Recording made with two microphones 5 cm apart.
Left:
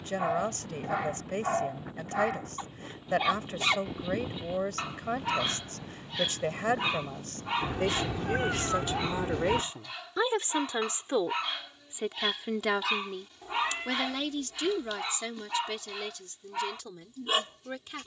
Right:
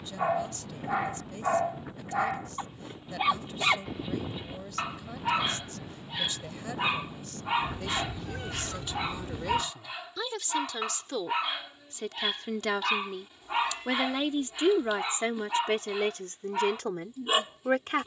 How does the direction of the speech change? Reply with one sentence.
You can hear the speech move to the right.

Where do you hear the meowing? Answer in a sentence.
You can hear the meowing on the left.